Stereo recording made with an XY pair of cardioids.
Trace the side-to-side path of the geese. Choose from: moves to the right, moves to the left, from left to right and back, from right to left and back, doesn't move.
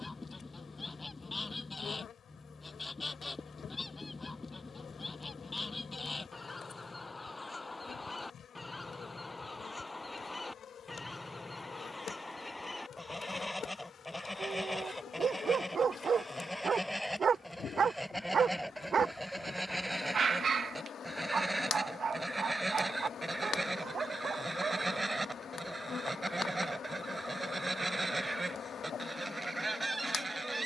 moves to the right.